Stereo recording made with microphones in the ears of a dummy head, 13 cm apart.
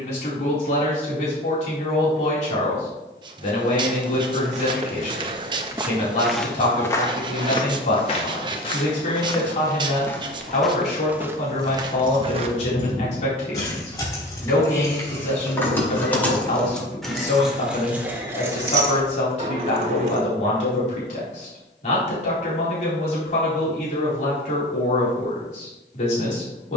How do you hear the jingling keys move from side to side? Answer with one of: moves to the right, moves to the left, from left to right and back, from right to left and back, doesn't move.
moves to the right.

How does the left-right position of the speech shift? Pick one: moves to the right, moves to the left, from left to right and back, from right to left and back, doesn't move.
doesn't move.